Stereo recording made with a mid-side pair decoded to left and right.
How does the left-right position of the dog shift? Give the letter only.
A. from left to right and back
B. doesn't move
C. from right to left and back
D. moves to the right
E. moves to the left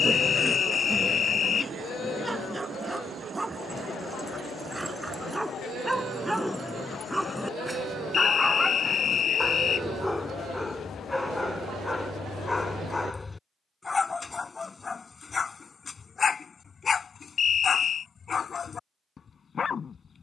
E.